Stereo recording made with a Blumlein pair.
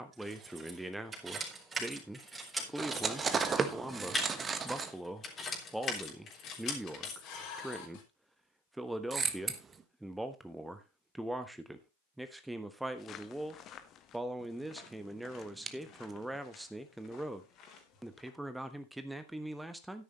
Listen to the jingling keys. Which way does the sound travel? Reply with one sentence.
In this clip you hear the jingling keys travel towards the left.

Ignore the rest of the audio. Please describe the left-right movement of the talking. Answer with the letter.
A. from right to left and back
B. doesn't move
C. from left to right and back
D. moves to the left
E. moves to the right
B.